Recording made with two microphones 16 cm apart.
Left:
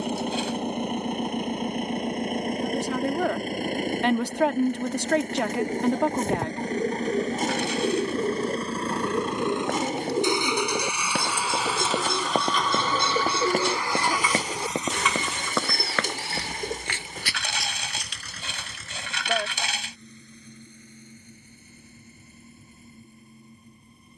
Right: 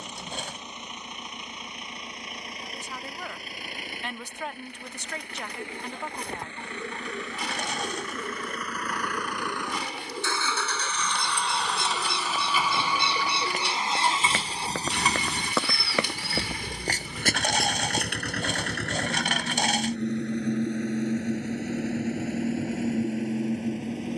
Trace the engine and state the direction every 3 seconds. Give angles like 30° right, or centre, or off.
50° left, 50° left, 40° left, 20° left, 20° right, 50° right, 70° right, 80° right.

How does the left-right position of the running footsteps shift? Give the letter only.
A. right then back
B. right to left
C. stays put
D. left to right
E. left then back
D.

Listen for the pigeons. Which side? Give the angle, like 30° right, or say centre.
40° left.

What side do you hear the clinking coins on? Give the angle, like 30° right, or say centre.
50° right.